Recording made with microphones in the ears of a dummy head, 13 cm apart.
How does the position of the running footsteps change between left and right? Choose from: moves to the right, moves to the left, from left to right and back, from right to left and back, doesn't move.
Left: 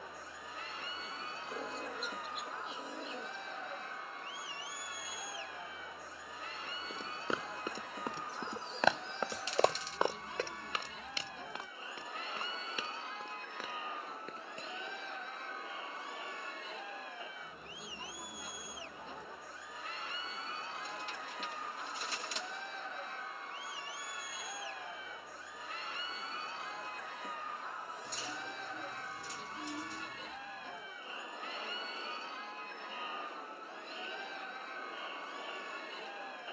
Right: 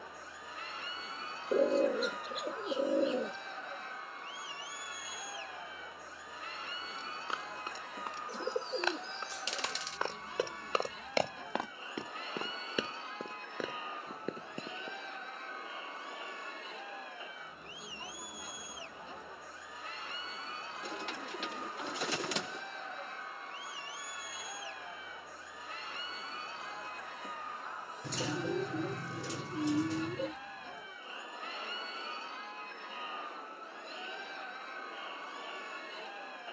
moves to the right.